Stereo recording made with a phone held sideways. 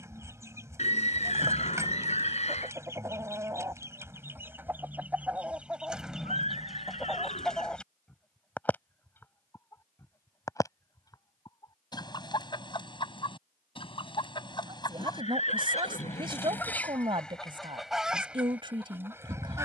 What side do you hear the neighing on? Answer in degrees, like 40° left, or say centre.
50° left.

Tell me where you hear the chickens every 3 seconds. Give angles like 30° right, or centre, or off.
20° right, 10° right, centre, 20° left, 30° left, 10° left, 10° right.